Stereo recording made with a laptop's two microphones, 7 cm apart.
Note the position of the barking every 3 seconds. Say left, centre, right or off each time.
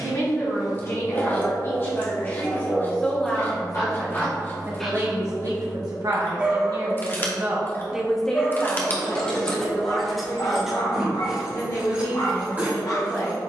left, left, centre, left, left.